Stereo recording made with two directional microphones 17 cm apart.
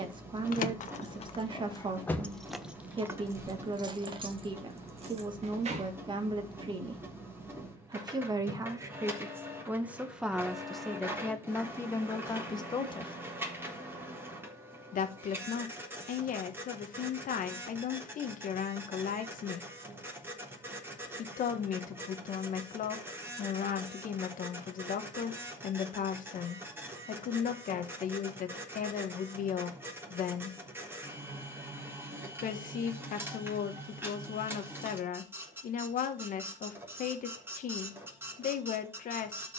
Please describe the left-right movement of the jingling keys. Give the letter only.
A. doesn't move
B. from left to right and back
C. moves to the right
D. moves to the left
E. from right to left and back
C.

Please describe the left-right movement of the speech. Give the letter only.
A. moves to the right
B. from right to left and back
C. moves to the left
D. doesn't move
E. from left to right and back
C.